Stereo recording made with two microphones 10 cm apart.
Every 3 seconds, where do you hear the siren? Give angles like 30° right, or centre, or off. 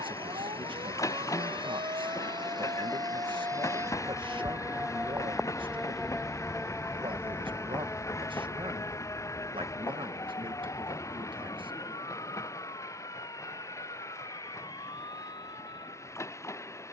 60° right, 20° right, 20° left, 40° left, 40° left, 50° left.